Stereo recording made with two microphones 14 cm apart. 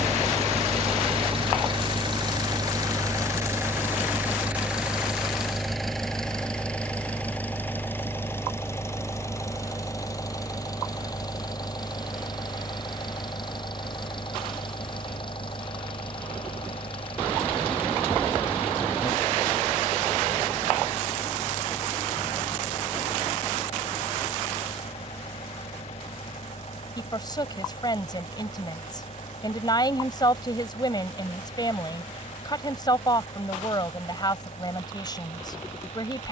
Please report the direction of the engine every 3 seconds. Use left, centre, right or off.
right, centre, centre, left, left, left, left, left, left, left, left, left.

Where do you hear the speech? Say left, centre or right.
left.